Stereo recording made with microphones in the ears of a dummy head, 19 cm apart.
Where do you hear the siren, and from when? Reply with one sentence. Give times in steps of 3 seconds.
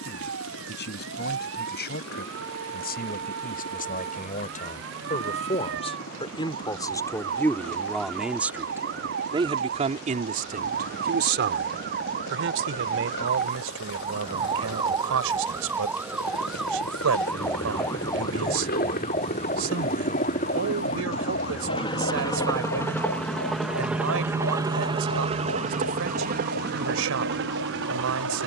You can hear the siren on the right from 0 s, in the centre from 15 s and on the left from 18 s.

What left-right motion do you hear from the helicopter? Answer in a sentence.
In this clip you hear the helicopter move from left to right.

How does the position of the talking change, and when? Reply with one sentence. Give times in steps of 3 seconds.
In this clip you hear the talking on the left from 0 s, in the centre from 6 s and on the right from 9 s.